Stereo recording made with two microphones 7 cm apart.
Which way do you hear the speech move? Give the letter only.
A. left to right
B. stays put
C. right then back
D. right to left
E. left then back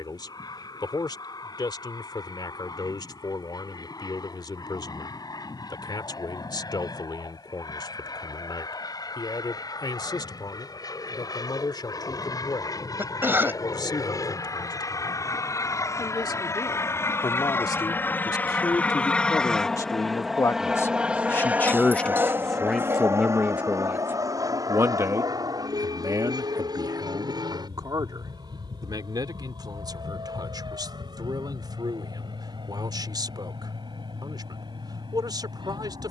A.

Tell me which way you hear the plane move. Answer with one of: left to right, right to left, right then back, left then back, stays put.
left to right.